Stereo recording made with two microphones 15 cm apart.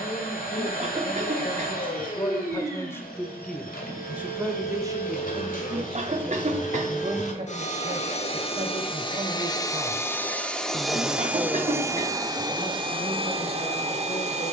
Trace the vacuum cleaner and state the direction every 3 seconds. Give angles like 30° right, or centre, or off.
70° left, 70° left, 50° left, 10° left, 40° right.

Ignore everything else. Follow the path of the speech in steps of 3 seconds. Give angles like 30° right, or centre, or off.
30° left, 20° right, 40° right, 20° right, 30° left.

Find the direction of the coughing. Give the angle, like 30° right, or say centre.
50° right.